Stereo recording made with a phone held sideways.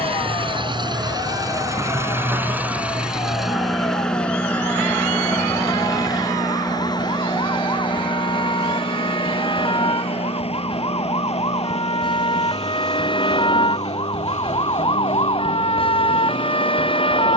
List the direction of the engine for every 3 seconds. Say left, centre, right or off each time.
right, centre, left, left, left, left.